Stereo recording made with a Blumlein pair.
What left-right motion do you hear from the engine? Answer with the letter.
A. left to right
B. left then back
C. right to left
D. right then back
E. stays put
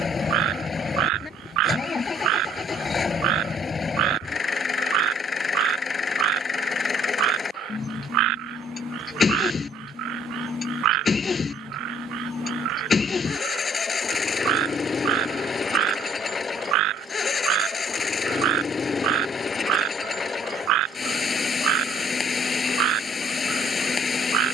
E.